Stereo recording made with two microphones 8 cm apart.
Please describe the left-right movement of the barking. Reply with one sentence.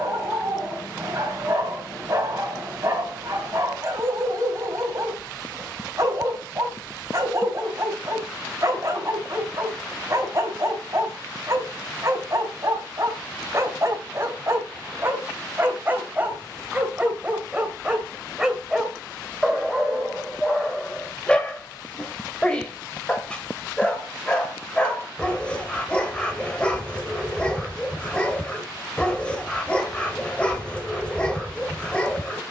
In this clip you hear the barking move to the left.